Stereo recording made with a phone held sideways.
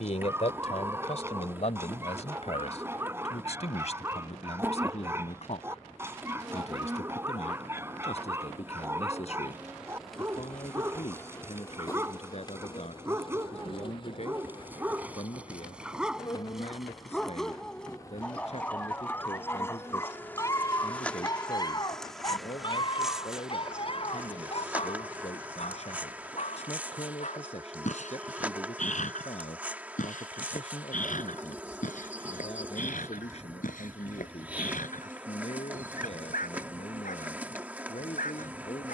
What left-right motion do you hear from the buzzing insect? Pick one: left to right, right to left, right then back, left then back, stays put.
left then back.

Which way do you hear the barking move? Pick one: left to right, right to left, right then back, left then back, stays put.
right to left.